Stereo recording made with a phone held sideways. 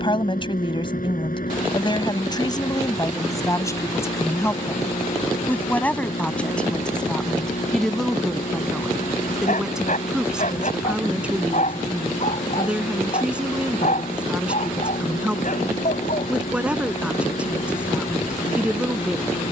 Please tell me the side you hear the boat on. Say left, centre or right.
left.